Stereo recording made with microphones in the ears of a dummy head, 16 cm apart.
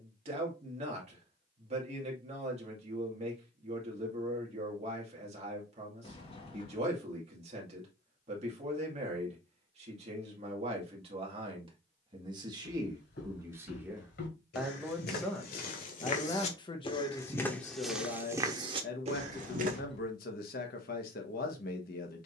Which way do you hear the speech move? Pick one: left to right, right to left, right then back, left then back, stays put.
right to left.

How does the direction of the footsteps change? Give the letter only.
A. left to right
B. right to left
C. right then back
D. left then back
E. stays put
A.